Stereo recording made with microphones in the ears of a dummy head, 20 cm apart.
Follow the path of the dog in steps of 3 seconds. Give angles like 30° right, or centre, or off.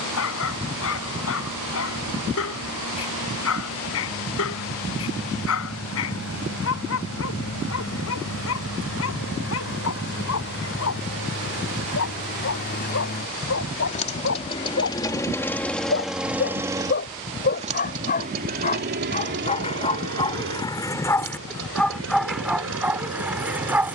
70° left, 70° left, 70° left, 70° left, 60° left, 50° left, 30° left, centre.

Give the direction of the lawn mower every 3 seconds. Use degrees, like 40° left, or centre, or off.
70° left, 70° left, 70° left, 60° left, 40° left, 10° right, 50° right, 70° right.